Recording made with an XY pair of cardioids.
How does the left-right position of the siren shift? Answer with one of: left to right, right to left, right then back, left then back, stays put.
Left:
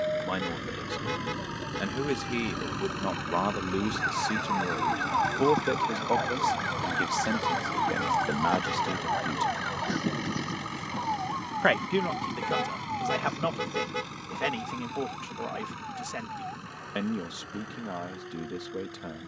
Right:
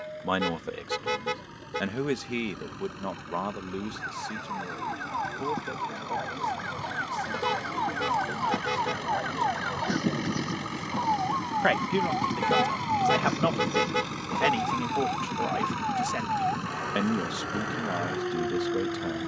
left to right.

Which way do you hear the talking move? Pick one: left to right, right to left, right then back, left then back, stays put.
left then back.